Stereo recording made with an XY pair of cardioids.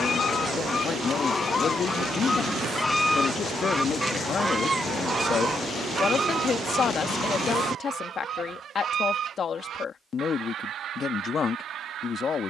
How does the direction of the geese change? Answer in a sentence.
In this clip you hear the geese move from left to right.